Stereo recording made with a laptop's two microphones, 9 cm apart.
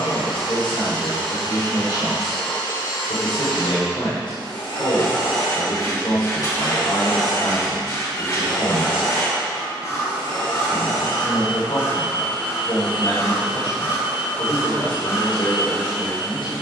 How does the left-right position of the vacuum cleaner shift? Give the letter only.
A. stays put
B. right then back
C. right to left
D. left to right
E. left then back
A.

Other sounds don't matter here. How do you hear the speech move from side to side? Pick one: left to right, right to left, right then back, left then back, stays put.
stays put.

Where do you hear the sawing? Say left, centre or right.
left.